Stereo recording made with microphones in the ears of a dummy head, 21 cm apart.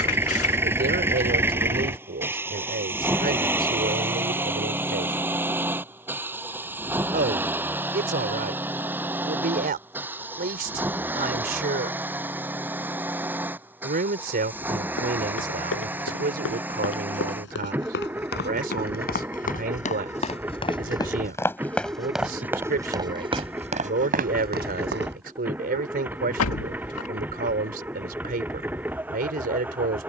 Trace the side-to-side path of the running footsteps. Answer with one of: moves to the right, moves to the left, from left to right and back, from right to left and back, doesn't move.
moves to the right.